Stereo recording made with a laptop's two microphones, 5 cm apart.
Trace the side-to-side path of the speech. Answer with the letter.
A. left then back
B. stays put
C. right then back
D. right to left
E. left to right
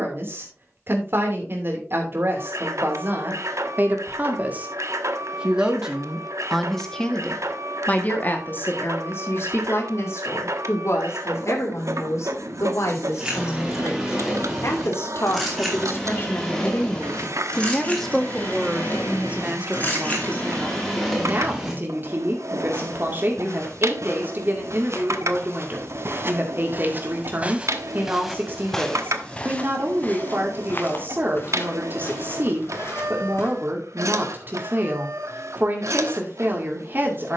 A.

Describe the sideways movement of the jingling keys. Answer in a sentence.
You can hear the jingling keys move from right to left and back again.